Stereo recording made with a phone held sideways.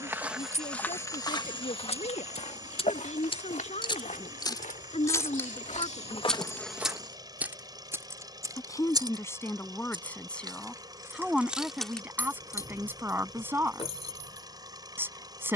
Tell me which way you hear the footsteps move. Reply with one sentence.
In this clip you hear the footsteps move from right to left and back again.